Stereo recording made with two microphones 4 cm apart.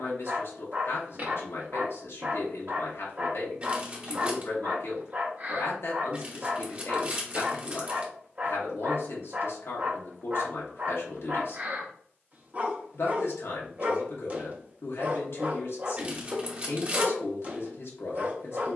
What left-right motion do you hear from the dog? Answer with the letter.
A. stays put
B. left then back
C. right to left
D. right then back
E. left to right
A.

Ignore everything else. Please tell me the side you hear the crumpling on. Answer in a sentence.
You can hear the crumpling on the right.